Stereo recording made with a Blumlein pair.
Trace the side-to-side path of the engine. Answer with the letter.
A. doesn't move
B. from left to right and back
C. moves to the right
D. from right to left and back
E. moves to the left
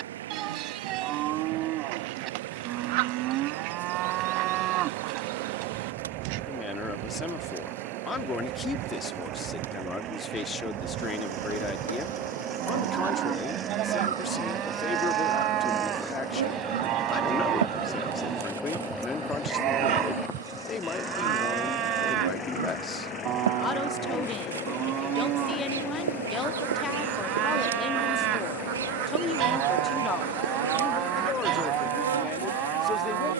E.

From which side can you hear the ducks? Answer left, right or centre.
right.